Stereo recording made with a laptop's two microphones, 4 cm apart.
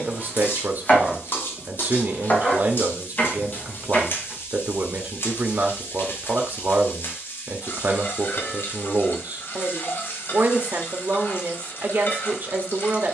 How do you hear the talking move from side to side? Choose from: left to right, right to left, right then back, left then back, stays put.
stays put.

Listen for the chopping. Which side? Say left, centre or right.
left.